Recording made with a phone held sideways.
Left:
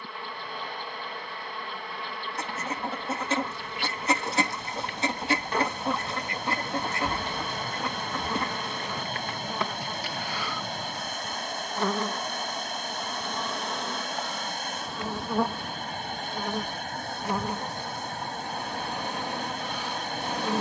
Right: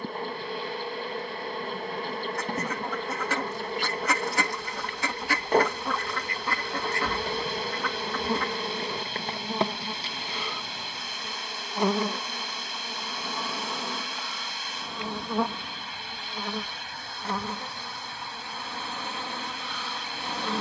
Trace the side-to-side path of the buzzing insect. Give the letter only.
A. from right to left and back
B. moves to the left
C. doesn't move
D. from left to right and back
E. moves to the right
B.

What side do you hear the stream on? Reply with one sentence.
You can hear the stream on the left.